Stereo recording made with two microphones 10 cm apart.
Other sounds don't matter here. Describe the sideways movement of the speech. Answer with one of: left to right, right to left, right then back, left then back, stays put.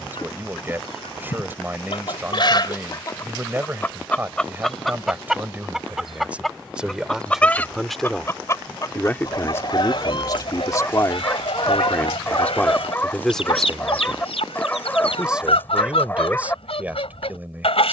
left then back.